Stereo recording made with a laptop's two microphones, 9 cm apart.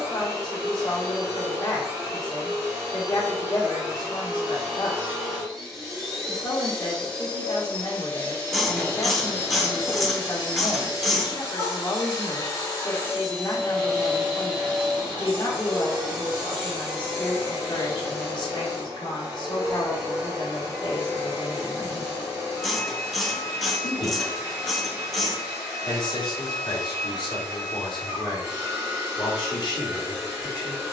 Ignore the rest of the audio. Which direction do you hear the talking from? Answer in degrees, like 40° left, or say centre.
60° left.